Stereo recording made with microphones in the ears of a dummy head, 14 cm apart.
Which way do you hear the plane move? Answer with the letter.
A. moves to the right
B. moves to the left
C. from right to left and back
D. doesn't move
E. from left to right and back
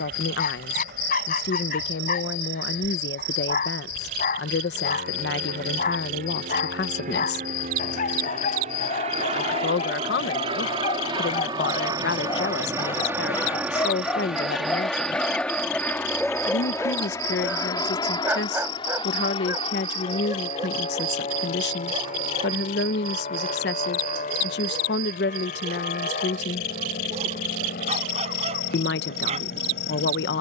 B.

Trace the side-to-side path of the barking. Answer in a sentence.
You can hear the barking travel towards the right.